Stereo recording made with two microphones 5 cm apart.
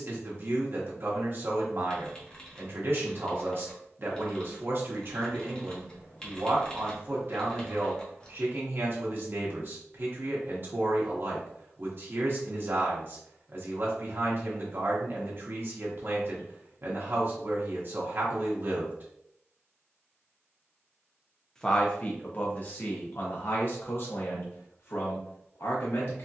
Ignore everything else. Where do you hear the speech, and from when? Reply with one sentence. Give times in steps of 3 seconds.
You can hear the speech on the right from 0 s and on the left from 21 s.